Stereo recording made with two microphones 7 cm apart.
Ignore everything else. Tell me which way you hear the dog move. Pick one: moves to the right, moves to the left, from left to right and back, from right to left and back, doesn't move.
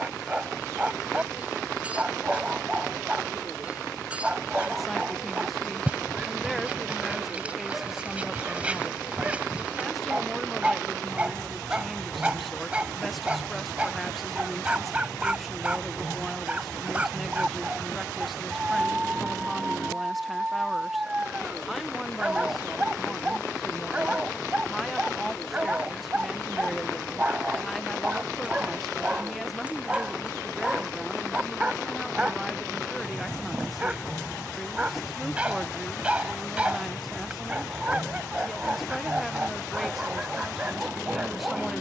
doesn't move.